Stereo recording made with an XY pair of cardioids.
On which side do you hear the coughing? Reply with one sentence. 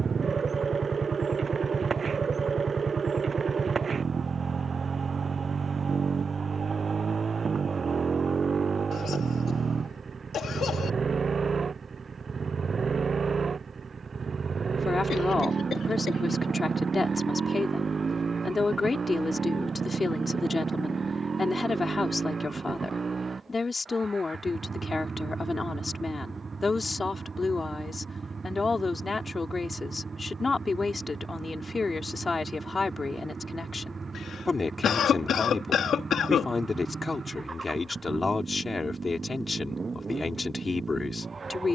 You can hear the coughing on the left.